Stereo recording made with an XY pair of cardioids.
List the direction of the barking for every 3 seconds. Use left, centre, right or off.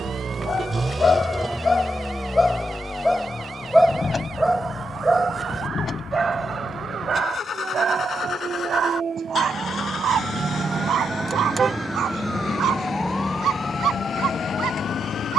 left, centre, right, right, right.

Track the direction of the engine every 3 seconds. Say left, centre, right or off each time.
centre, left, left, left, left.